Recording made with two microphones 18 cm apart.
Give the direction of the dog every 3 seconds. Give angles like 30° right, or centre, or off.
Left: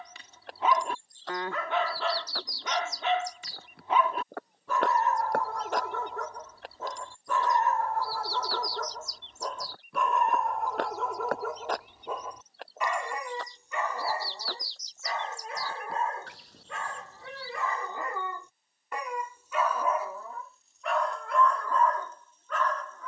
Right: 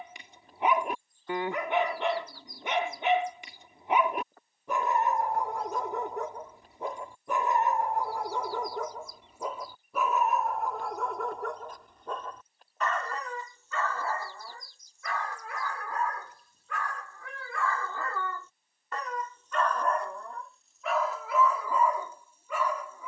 20° right, 20° right, 20° right, centre, 20° left, 20° left, 10° left, 10° right.